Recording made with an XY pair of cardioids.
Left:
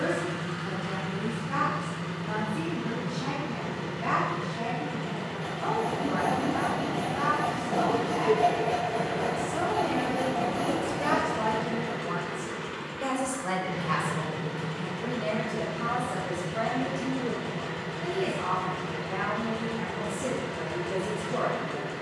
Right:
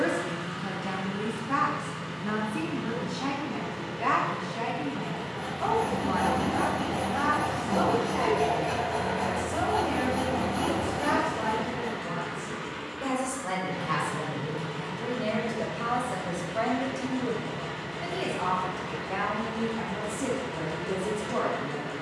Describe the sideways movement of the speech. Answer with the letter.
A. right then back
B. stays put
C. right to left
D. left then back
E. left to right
D.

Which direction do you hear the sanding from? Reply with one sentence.
In this clip you hear the sanding on the right.